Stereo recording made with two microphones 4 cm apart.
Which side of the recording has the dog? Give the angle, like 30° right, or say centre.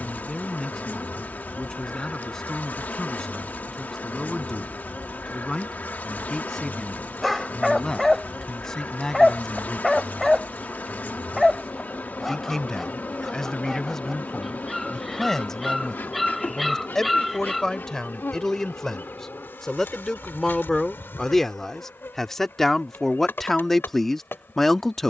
centre.